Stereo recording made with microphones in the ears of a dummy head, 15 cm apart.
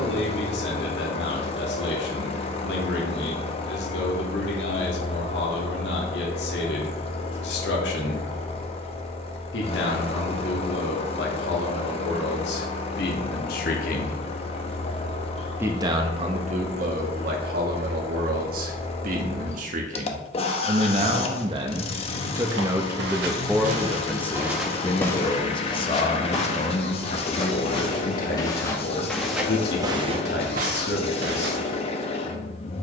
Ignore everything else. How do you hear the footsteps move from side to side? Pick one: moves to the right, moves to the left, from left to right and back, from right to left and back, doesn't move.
from right to left and back.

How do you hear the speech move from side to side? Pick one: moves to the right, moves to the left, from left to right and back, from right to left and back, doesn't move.
from left to right and back.